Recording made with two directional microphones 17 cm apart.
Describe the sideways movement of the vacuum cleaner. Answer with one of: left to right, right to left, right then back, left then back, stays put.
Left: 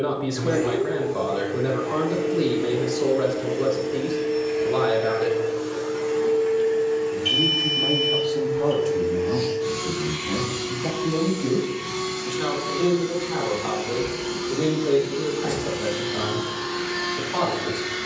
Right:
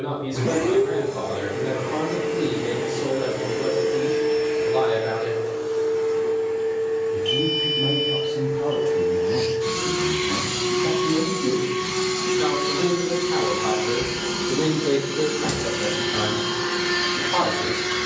left then back.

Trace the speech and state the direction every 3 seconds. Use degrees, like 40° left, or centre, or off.
40° left, 40° left, 30° left, 10° left, 20° right, 40° right.